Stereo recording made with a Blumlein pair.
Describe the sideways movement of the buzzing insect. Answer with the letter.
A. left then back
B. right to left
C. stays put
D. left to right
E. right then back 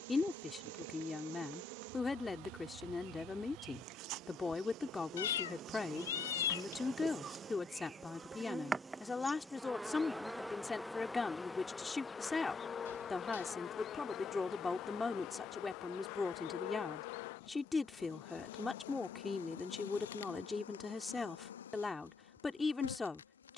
B.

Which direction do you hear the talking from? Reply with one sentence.
You can hear the talking in the centre.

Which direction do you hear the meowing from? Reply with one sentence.
In this clip you hear the meowing on the left.